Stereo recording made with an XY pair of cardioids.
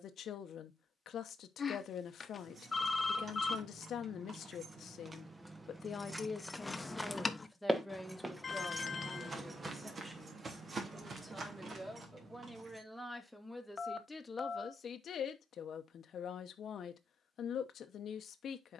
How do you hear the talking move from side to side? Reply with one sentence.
You can hear the talking go right and come back.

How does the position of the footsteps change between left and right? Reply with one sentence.
In this clip you hear the footsteps go from the left side to the right.